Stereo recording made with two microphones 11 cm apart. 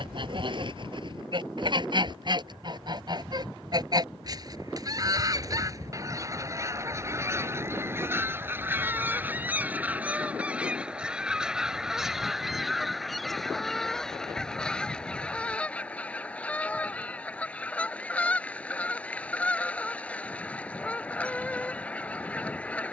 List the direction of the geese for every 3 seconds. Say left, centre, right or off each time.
right, right, right, centre, centre, centre, centre, centre.